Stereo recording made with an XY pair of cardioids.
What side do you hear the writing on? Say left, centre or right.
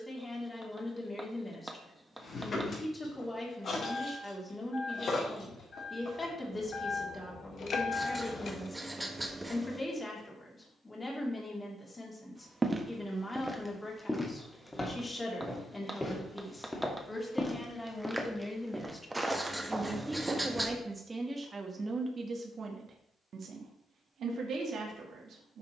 centre.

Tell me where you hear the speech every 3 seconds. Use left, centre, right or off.
left, left, left, left, left, left, centre, right, right.